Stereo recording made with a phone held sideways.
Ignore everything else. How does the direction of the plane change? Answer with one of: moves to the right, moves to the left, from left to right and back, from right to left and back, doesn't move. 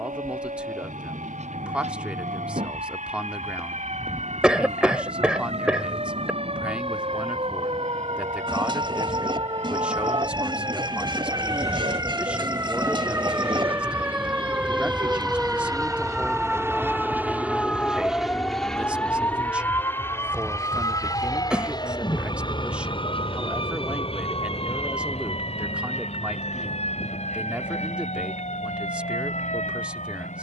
moves to the left.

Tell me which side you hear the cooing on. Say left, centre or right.
right.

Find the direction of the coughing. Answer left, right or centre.
centre.